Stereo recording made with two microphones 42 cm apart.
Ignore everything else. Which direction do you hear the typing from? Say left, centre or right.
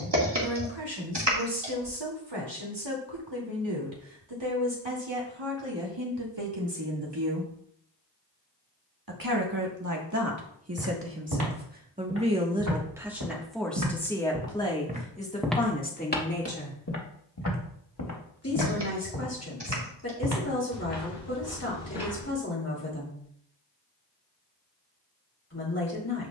right.